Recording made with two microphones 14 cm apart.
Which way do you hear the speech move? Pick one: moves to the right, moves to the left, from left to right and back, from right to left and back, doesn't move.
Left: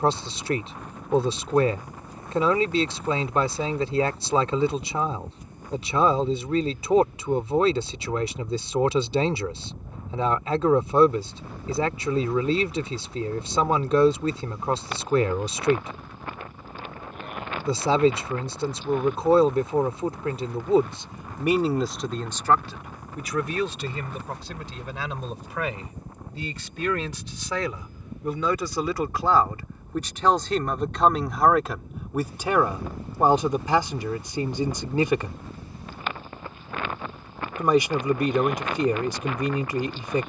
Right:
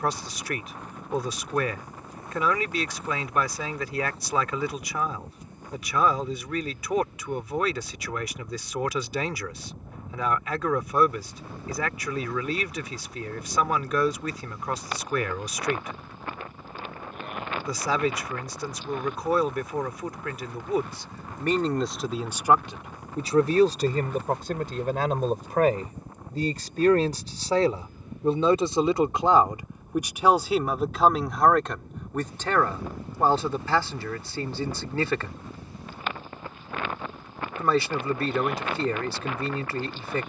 from left to right and back.